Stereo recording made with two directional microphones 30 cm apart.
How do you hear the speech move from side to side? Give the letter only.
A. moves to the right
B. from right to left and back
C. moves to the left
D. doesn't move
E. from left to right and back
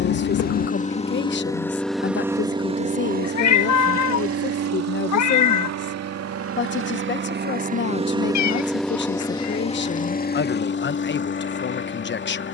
D.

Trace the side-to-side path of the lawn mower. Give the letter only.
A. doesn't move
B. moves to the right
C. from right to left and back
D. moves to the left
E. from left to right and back
E.